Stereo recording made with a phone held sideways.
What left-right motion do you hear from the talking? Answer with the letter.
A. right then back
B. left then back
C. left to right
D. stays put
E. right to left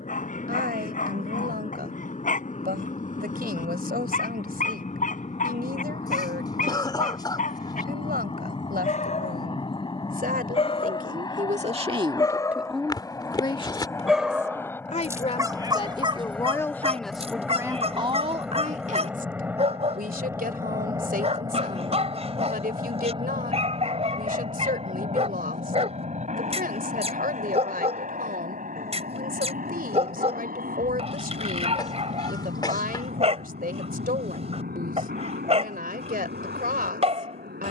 B.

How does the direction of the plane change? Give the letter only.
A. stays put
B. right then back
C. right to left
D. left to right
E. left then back
D.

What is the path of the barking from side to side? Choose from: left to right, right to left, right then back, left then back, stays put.
left to right.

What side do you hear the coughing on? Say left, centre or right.
left.